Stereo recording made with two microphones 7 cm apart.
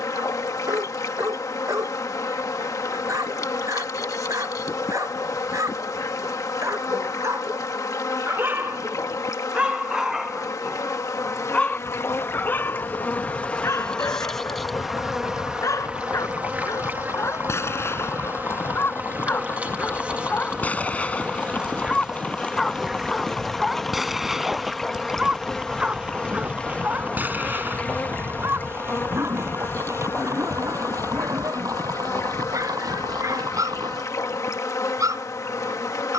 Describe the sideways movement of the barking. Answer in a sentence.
You can hear the barking go left and come back.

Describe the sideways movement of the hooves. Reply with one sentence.
In this clip you hear the hooves move from left to right.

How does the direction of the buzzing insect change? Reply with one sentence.
In this clip you hear the buzzing insect go right and come back.